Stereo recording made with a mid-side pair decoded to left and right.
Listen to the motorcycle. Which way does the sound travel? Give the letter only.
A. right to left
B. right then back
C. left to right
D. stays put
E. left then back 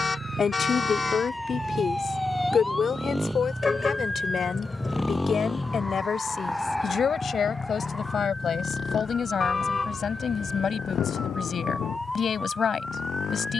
A.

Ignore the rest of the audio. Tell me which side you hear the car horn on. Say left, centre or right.
left.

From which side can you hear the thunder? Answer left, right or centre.
left.